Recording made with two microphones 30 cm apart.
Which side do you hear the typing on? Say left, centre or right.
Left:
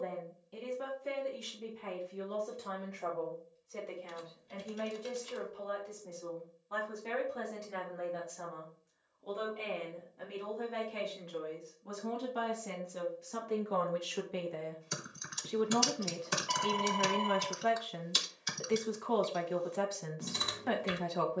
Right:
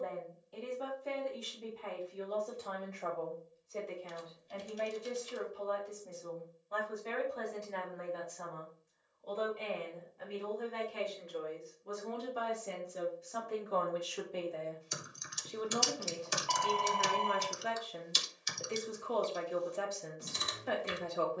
left.